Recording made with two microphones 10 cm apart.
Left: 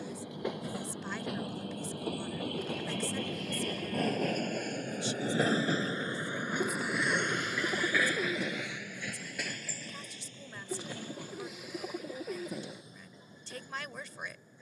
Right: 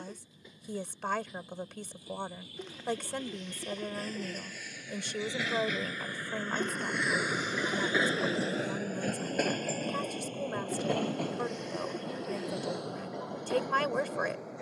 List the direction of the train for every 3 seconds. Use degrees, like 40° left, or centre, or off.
70° left, 50° left, 10° right, 50° right, 70° right.